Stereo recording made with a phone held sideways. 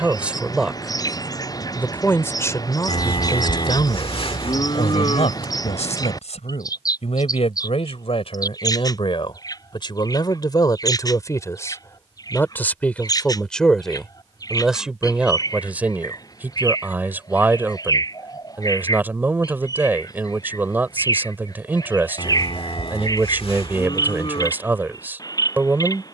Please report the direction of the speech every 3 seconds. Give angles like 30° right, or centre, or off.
10° left, 50° left, 50° left, 30° left, 10° left, 10° right, 20° right, 20° right, 20° right.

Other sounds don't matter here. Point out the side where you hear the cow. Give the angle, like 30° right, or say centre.
50° left.